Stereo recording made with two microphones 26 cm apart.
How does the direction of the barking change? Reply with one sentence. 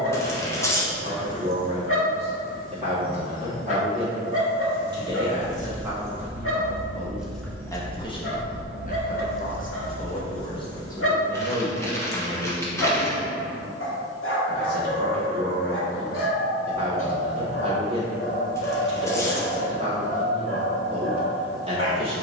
You can hear the barking stay in one place.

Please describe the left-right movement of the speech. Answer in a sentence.
You can hear the speech go left and come back.